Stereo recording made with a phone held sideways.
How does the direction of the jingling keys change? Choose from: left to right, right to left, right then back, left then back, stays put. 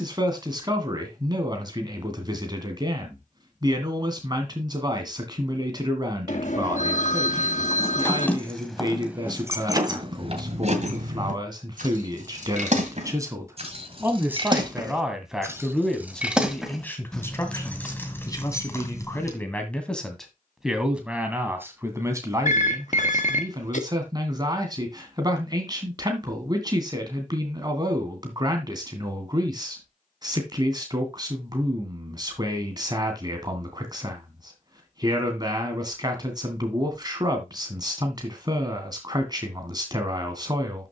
right then back.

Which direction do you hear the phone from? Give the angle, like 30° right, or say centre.
60° left.